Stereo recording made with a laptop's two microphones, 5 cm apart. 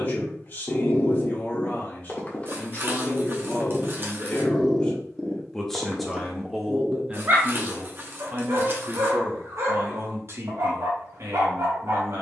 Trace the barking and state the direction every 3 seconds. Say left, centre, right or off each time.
left, centre, right, right.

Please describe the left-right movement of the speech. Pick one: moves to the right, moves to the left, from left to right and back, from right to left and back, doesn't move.
moves to the right.